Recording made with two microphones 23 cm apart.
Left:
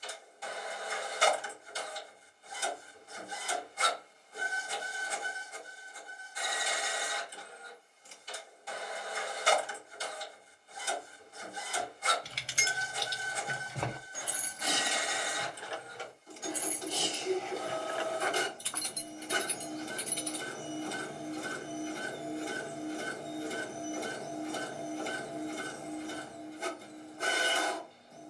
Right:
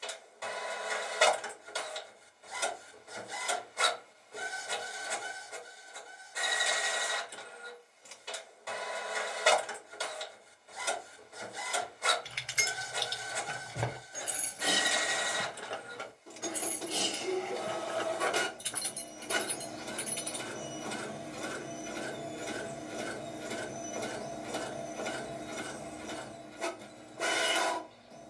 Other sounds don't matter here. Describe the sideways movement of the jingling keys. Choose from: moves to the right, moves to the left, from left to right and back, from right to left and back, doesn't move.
from left to right and back.